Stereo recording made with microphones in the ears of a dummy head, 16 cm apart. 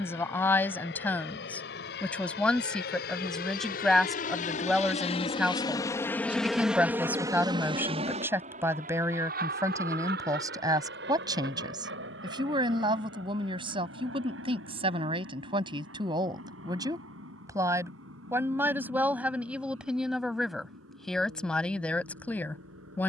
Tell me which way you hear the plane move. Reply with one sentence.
You can hear the plane travel towards the right.